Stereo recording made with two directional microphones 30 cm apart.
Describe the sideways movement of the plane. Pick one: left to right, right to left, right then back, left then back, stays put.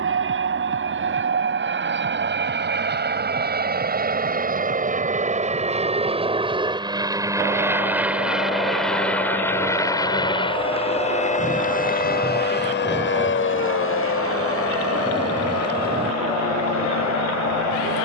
right to left.